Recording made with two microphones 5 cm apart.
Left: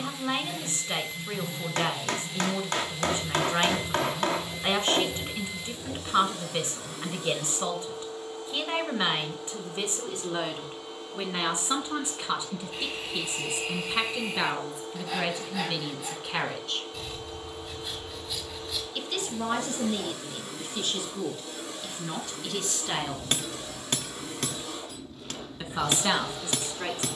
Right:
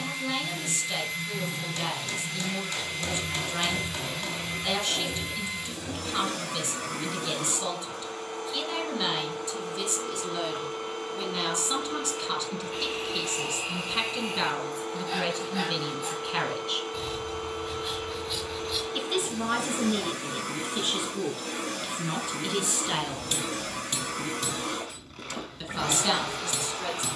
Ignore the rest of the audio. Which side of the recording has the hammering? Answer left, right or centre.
left.